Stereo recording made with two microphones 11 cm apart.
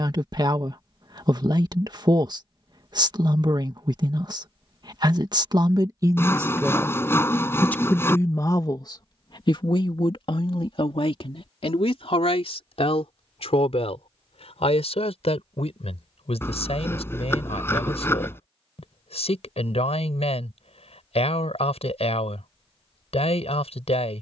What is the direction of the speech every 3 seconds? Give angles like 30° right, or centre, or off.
40° right, 40° right, 10° left, 60° left, 70° left, 70° left, 70° left, 70° left.